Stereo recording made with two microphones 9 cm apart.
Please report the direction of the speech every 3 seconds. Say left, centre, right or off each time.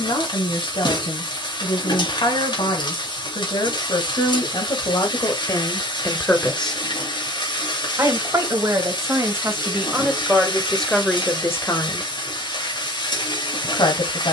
left, left, centre, centre, left.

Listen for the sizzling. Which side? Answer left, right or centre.
left.